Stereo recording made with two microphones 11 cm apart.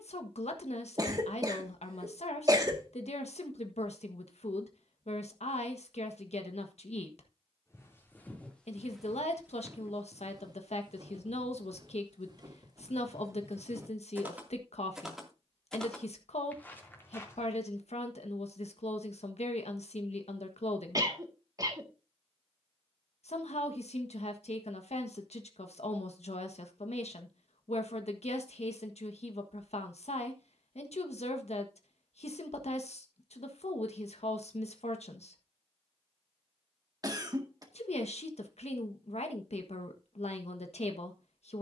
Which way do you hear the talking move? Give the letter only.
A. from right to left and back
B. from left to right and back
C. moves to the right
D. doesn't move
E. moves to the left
D.